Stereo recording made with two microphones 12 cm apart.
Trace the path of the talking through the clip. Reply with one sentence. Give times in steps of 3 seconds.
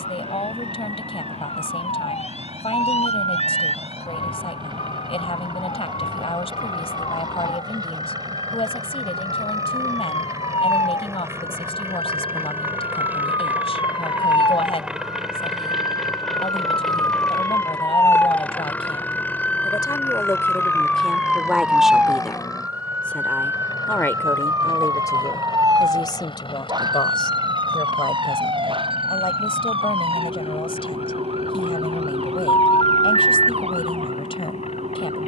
In this clip you hear the talking on the left from 0 s, in the centre from 21 s and on the left from 24 s.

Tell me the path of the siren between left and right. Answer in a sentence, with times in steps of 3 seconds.
In this clip you hear the siren on the left from 0 s, in the centre from 18 s and on the right from 24 s.